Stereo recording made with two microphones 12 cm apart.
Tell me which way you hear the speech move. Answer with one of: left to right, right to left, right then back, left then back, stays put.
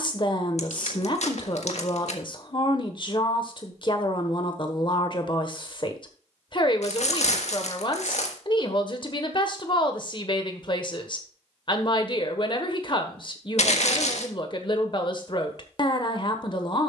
stays put.